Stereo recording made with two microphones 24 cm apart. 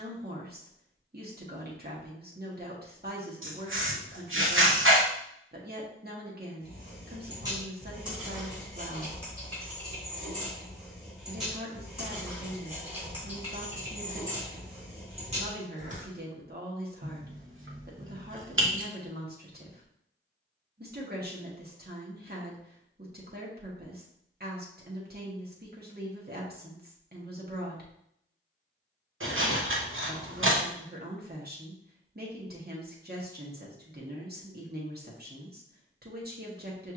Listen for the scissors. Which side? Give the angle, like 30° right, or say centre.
60° right.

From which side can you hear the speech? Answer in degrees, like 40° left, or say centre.
40° right.